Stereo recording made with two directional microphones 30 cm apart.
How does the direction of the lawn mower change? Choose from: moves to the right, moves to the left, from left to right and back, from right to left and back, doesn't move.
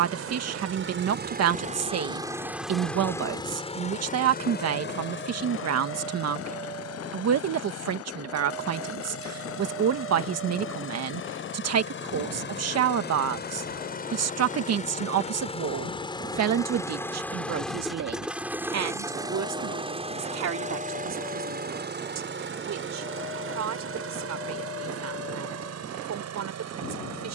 from right to left and back.